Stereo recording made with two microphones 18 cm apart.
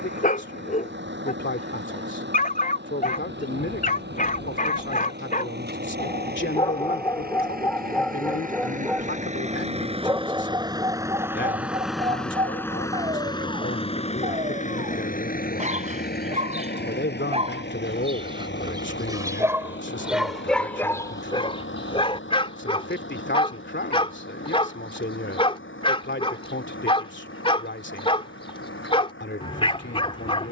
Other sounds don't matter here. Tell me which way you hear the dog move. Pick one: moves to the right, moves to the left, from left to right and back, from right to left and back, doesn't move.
from left to right and back.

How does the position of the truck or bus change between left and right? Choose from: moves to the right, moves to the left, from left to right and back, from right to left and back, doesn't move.
moves to the left.